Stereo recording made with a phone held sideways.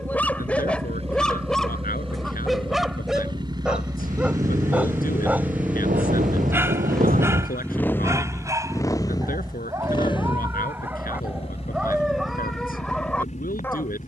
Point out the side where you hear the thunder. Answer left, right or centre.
right.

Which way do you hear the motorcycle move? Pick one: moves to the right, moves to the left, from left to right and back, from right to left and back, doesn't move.
moves to the left.